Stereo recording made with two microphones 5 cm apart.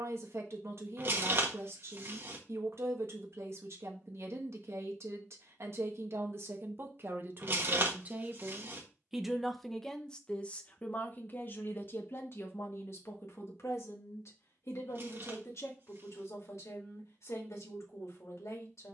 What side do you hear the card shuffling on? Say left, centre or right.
right.